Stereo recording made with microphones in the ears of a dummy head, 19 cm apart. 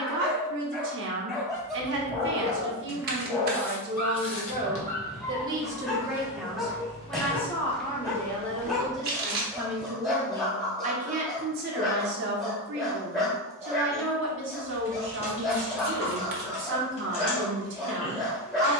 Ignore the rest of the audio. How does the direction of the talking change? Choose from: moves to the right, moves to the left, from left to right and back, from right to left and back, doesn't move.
from right to left and back.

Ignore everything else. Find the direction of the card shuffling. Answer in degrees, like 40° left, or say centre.
40° right.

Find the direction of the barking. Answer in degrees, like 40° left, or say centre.
centre.